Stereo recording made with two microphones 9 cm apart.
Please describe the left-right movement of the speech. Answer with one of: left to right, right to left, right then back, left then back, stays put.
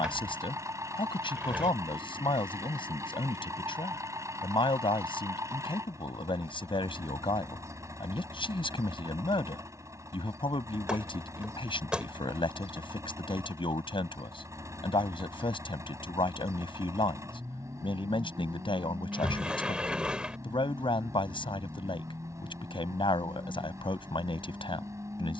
stays put.